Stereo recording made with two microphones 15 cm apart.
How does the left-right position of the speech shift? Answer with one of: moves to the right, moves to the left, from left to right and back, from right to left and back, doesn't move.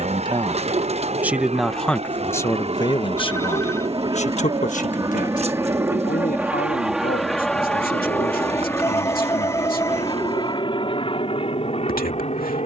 moves to the left.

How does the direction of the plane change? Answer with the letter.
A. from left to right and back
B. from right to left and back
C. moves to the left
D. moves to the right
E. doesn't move
C.